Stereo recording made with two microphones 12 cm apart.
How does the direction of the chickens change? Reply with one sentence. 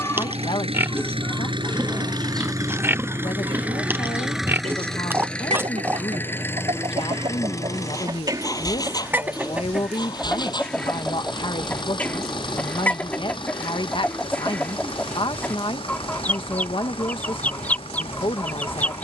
In this clip you hear the chickens move from left to right and back again.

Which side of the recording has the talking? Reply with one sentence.
You can hear the talking on the left.